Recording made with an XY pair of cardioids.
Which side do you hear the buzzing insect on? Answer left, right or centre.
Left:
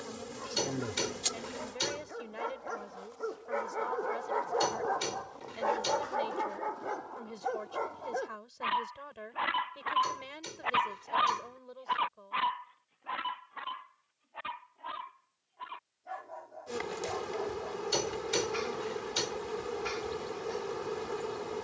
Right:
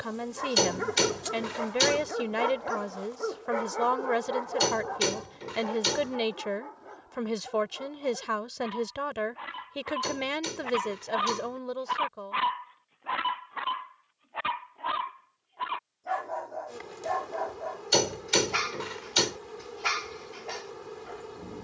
left.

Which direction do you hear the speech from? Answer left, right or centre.
right.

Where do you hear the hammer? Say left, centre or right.
right.